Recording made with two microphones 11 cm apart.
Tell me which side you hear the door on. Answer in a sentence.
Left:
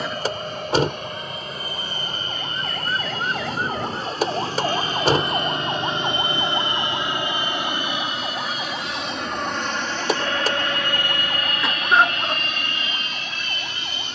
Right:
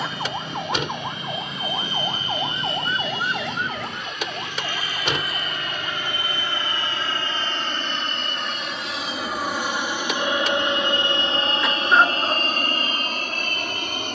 In this clip you hear the door on the left.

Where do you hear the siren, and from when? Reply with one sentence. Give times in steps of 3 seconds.
You can hear the siren on the right from 0 s and on the left from 3 s.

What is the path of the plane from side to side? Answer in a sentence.
You can hear the plane go from the left side to the right.